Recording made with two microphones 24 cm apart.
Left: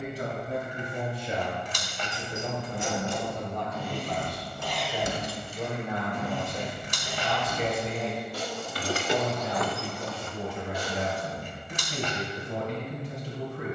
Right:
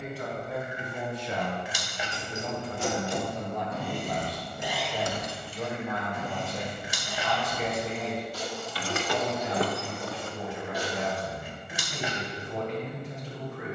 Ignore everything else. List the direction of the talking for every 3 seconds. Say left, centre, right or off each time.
left, centre, left, left, left.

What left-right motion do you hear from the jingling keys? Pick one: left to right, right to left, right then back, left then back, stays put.
left then back.